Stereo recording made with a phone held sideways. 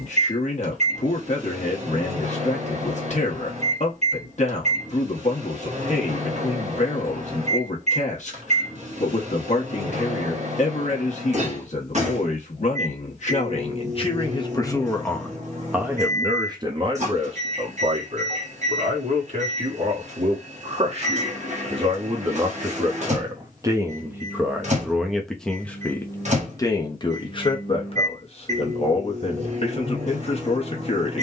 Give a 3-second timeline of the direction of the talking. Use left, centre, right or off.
left, left, left, left, left, right, right, right, centre, left, left.